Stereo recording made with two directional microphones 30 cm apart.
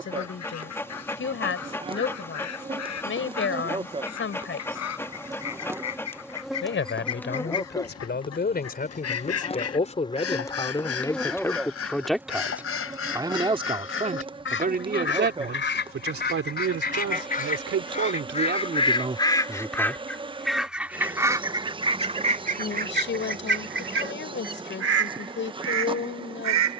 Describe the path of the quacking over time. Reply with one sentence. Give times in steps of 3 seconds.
In this clip you hear the quacking on the left from 0 s, in the centre from 18 s and on the right from 21 s.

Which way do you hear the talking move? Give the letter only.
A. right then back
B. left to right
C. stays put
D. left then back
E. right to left
A.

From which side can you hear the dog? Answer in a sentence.
In this clip you hear the dog in the centre.